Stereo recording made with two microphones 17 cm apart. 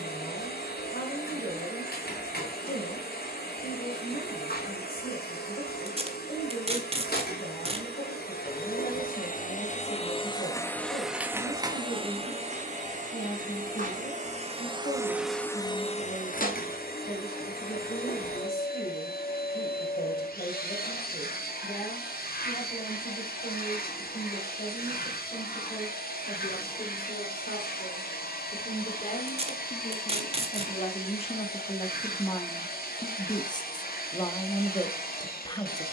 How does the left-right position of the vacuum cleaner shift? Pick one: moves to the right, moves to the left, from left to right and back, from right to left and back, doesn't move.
from left to right and back.